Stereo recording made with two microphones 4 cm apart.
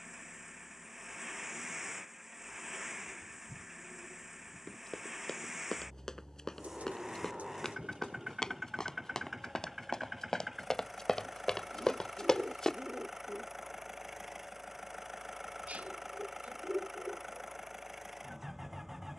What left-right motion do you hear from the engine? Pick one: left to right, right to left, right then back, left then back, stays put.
stays put.